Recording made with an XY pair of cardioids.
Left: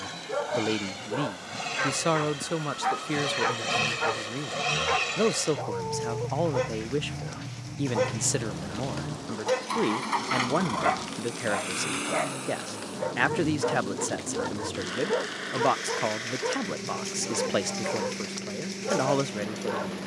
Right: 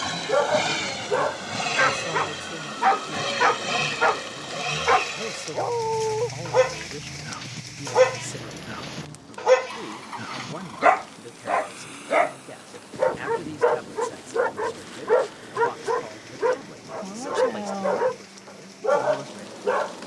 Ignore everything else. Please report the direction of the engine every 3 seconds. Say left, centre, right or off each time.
right, centre, left, left, left, left, left.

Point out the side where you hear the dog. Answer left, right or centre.
right.